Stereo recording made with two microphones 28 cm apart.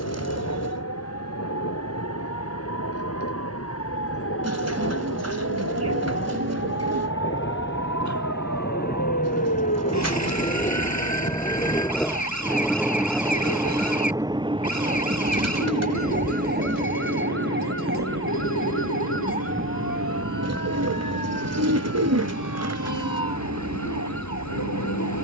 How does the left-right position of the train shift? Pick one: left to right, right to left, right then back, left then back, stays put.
left to right.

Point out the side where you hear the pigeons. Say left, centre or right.
right.